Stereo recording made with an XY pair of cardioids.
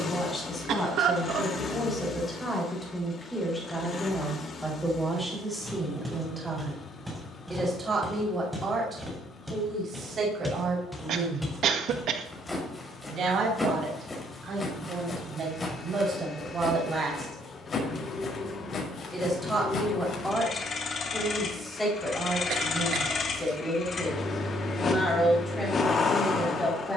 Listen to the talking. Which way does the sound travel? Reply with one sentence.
You can hear the talking move from left to right and back again.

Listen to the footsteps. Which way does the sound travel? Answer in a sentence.
You can hear the footsteps move from right to left.